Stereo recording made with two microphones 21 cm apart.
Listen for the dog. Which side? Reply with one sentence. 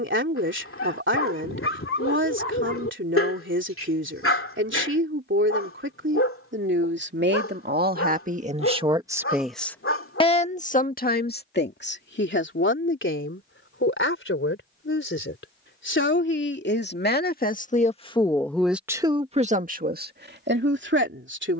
You can hear the dog on the left.